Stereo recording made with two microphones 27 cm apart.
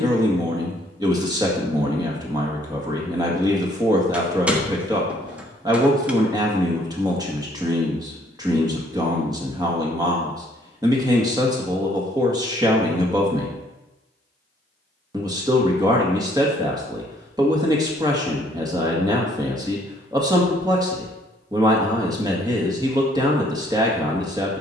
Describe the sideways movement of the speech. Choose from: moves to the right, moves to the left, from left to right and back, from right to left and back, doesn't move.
doesn't move.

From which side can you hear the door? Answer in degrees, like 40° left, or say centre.
centre.